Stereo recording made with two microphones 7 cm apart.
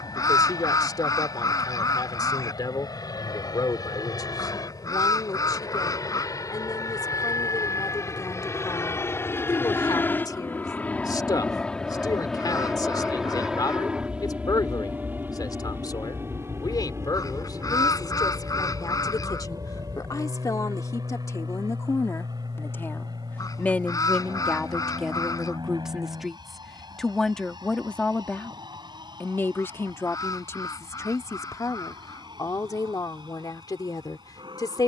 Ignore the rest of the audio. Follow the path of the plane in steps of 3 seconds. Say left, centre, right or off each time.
left, left, left, left, centre, right, right, right, right, right, right, right.